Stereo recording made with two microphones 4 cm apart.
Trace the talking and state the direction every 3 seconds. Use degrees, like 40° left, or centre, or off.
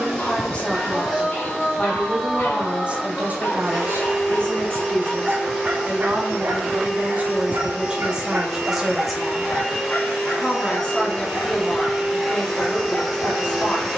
centre, 50° right, 30° right, 20° left, 20° left.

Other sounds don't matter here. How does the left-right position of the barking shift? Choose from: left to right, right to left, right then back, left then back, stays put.
right then back.